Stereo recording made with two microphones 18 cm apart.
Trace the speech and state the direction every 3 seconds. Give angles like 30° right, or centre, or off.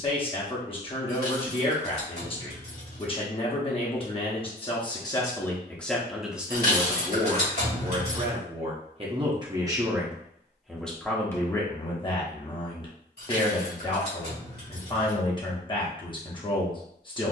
30° left, 20° left, 20° right, centre, 30° left, 30° left.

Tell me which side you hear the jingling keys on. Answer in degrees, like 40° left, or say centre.
60° left.